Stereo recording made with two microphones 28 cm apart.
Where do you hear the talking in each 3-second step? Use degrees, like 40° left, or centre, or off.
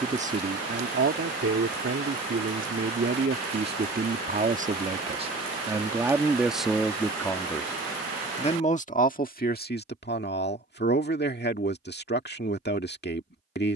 40° right, 30° right, 10° left, 40° left, 40° left.